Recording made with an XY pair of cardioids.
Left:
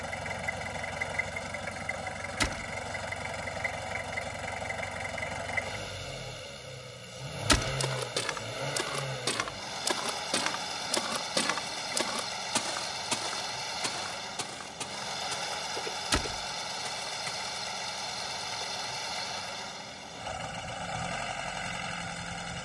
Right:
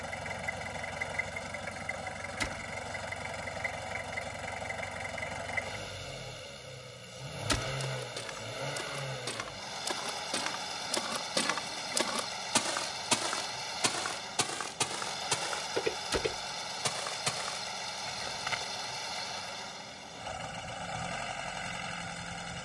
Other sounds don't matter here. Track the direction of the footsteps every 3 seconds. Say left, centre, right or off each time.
off, off, left, left, right, right, right, off.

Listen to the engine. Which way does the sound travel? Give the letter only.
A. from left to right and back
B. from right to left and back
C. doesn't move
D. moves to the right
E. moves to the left
C.